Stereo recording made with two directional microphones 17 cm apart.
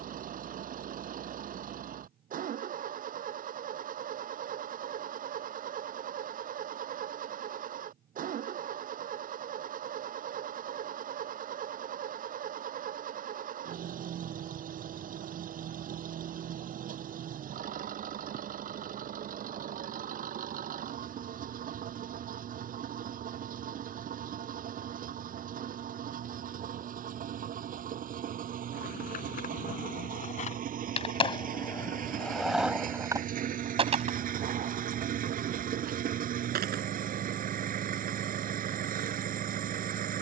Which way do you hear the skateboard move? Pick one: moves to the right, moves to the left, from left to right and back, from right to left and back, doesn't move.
moves to the right.